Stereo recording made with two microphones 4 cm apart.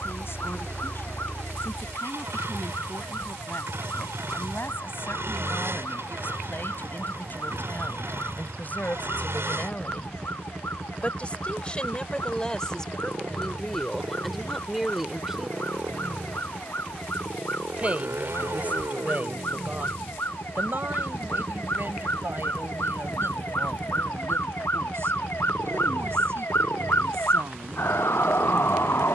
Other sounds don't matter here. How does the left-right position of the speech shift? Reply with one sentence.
You can hear the speech travel towards the right.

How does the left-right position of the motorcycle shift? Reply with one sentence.
In this clip you hear the motorcycle stay in one place.